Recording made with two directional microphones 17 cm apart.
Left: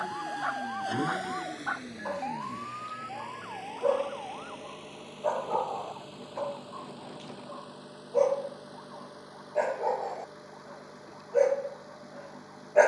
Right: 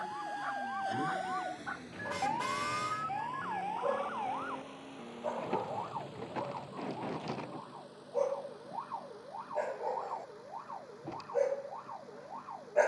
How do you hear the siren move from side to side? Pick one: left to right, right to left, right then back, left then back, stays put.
left to right.